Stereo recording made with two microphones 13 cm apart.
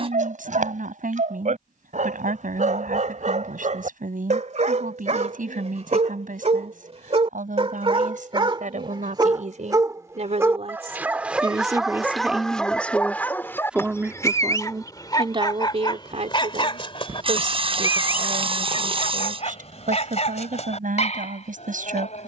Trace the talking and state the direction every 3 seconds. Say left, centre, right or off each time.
right, right, right, right, centre, right, right, right.